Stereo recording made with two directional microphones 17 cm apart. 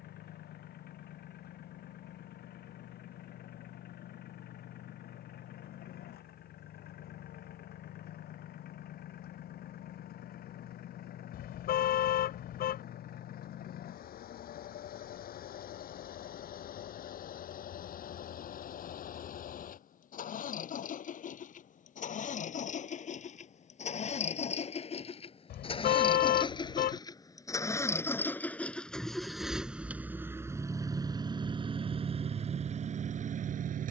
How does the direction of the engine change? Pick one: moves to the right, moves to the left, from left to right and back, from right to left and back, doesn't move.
moves to the right.